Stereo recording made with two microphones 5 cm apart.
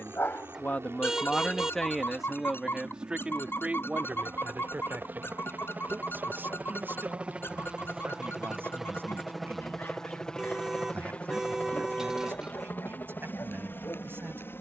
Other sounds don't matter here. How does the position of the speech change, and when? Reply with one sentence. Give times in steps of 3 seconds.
In this clip you hear the speech in the centre from 0 s and on the right from 3 s.